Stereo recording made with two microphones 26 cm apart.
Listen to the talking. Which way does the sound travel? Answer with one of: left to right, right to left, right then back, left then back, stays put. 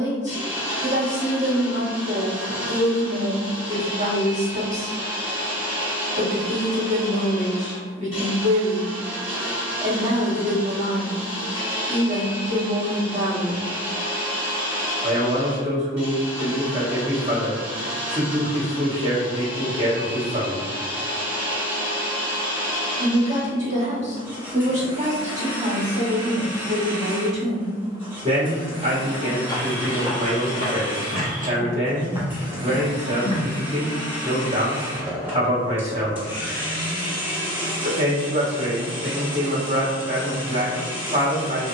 stays put.